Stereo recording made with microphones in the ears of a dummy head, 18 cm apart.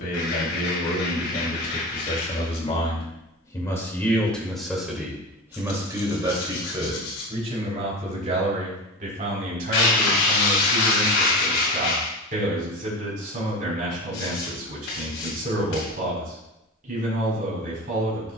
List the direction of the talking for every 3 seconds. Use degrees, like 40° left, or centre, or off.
40° left, centre, 30° right, 50° right, 50° right, 50° right.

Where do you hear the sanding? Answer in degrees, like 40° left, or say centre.
70° left.